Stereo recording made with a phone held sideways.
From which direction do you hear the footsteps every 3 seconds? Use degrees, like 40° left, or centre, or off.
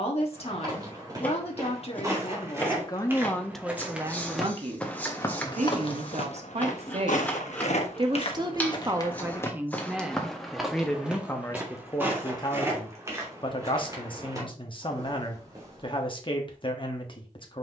20° right, 10° left, 50° left, centre, 20° right, 30° right.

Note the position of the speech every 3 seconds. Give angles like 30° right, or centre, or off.
40° left, 20° right, 40° right, centre, 30° left, 40° left.